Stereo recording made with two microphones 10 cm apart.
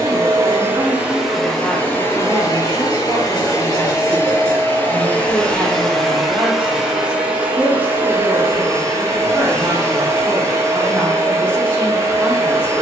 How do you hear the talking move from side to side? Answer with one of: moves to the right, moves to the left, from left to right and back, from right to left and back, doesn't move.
doesn't move.